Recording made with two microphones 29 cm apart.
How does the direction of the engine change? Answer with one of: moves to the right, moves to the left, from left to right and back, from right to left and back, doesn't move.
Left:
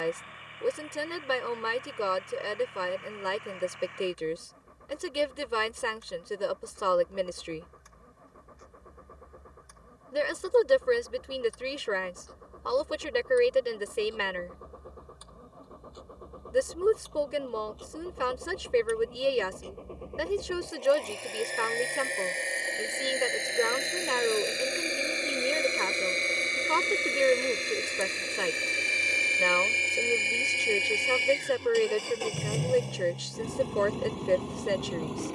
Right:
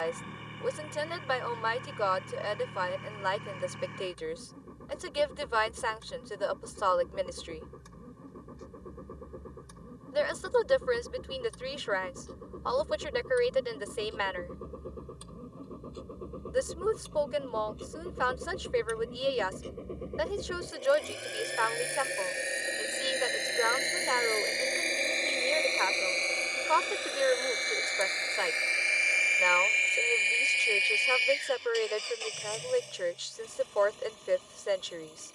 moves to the left.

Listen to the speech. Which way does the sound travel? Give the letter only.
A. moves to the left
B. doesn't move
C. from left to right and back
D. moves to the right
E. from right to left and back
B.